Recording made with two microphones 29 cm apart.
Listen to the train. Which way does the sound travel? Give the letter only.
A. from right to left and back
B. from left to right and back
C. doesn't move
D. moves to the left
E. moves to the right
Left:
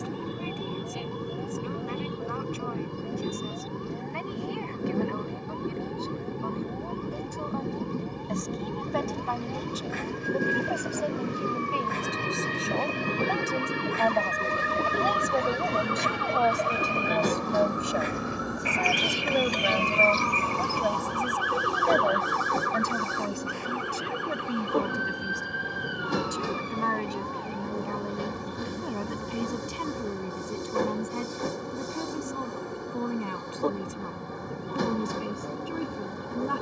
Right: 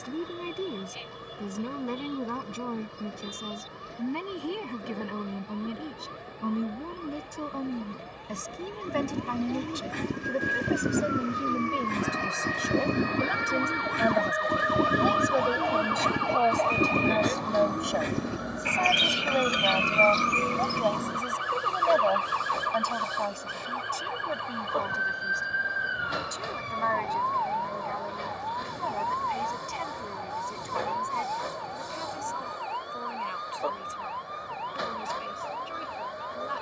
C.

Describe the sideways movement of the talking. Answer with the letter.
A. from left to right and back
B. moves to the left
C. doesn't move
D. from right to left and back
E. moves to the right
B.